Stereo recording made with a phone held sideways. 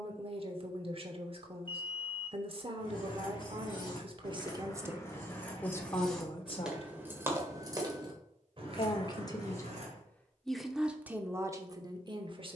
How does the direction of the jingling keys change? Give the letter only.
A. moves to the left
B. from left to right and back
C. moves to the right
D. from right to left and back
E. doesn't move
C.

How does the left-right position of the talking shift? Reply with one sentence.
In this clip you hear the talking go left and come back.